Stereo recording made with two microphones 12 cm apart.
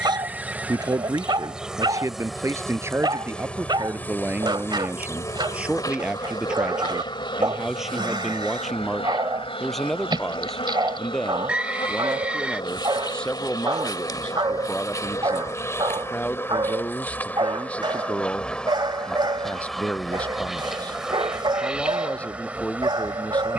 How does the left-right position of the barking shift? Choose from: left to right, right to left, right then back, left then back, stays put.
stays put.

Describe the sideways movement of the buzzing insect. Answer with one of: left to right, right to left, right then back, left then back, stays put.
left then back.